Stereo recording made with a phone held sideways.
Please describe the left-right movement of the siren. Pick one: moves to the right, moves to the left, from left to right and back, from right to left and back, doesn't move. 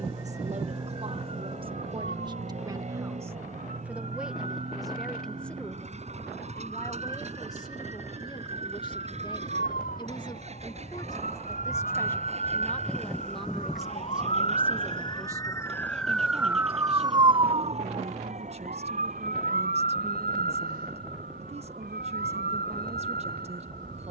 moves to the right.